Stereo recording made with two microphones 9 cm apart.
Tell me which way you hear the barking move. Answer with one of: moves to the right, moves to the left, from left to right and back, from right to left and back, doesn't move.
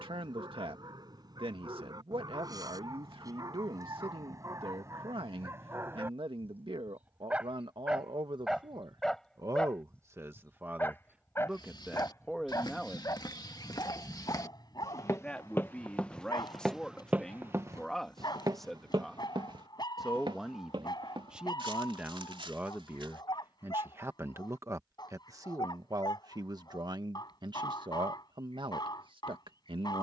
moves to the left.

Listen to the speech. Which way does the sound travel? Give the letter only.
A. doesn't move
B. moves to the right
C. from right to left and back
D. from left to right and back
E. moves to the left
C.